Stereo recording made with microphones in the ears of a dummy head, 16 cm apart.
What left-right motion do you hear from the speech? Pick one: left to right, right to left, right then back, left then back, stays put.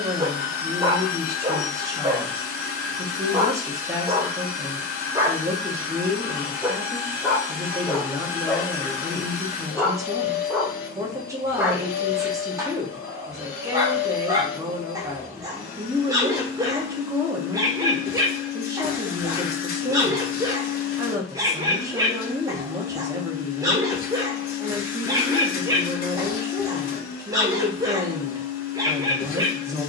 stays put.